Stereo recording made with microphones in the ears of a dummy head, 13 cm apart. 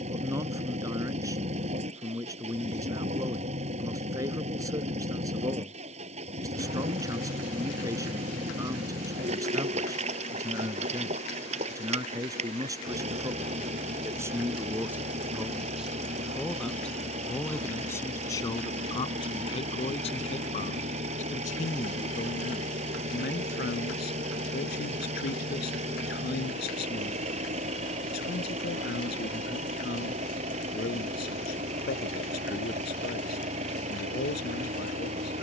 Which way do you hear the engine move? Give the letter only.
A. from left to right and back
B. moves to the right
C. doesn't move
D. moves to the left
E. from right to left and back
C.